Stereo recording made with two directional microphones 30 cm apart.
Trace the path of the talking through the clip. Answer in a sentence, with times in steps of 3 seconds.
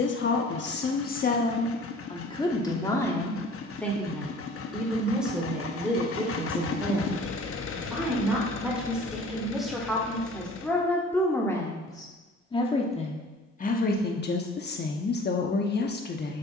In this clip you hear the talking on the left from 0 s, in the centre from 3 s and on the left from 12 s.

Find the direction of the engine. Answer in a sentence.
You can hear the engine on the left.